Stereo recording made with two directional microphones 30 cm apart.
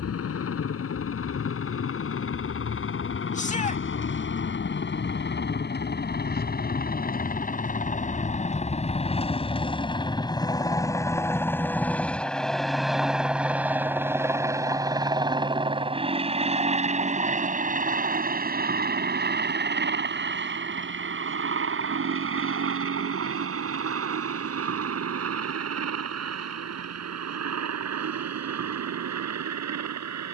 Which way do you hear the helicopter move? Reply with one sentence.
In this clip you hear the helicopter move to the right.